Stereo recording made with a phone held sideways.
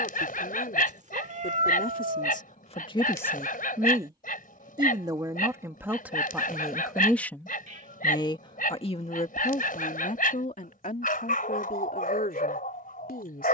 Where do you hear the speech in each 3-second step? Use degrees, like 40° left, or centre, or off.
70° left, 10° right, 10° left, 60° left, 70° left.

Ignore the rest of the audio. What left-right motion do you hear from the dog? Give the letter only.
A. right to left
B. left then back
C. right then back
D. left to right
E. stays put
E.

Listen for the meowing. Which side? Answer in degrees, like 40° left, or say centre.
50° right.